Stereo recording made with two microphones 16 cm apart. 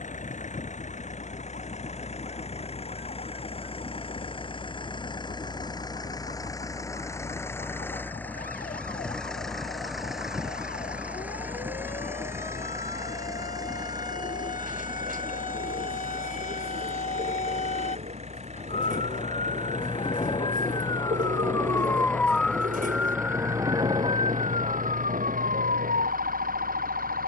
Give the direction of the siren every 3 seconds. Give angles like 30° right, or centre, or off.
70° left, 70° left, 60° left, 60° left, 60° left, 50° left, 40° left, centre, 50° right.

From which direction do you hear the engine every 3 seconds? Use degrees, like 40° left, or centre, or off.
40° left, 30° left, 10° left, 10° right, 20° right, 40° right, 50° right, 50° right, 60° right.